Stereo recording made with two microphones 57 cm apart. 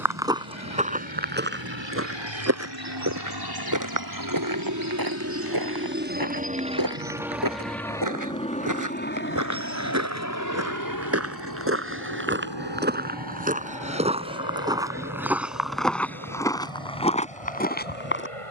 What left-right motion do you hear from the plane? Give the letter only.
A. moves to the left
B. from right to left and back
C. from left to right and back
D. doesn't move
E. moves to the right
A.